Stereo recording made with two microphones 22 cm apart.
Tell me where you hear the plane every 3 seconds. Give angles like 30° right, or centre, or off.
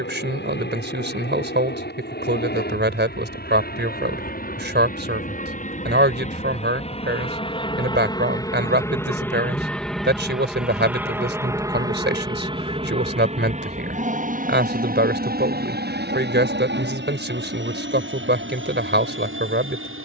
50° left, 40° left, 20° left, centre, 30° right, 50° right, 60° right.